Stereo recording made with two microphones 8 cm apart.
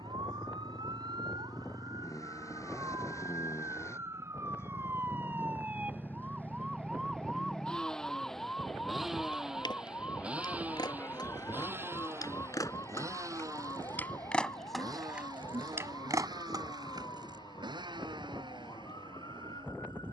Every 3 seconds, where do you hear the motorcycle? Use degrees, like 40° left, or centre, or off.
40° left, 30° left, 10° left, 20° right, 40° right, 60° right, 70° right.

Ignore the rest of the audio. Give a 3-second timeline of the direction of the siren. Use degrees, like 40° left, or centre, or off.
60° right, 30° right, centre, 30° left, 40° left, 50° left, 50° left.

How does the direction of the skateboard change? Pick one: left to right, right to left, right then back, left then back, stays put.
left to right.